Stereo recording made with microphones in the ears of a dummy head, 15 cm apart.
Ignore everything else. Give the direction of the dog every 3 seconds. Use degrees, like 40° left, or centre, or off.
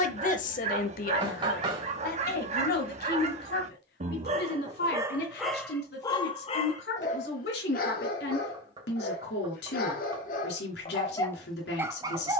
40° right, 20° right, 50° left, 40° left.